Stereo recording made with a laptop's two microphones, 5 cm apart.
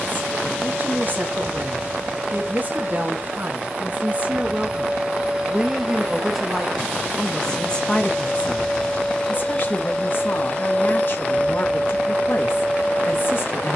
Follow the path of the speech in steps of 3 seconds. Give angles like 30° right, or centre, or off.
40° right, 30° right, 10° left, 50° left, 50° left.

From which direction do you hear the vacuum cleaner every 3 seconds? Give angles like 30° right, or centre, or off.
30° right, 20° right, 10° left, 30° left, 30° left.